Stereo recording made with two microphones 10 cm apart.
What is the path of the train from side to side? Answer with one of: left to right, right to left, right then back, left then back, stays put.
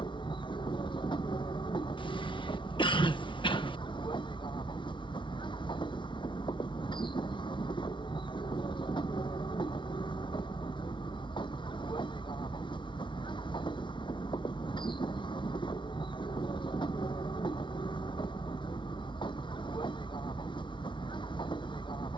stays put.